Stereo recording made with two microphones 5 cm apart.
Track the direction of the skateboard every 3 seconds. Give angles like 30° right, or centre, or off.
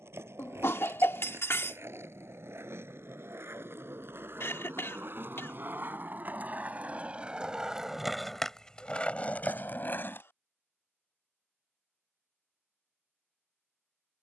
70° right, 50° right, 10° right, 40° left, off.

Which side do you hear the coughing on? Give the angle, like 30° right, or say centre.
60° left.